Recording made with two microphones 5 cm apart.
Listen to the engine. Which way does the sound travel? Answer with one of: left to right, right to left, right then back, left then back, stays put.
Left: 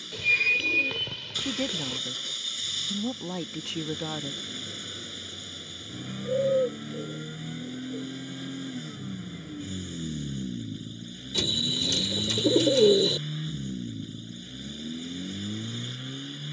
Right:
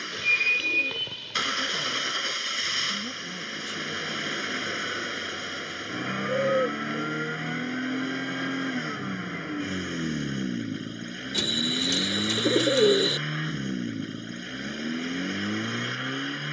stays put.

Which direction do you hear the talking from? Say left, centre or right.
left.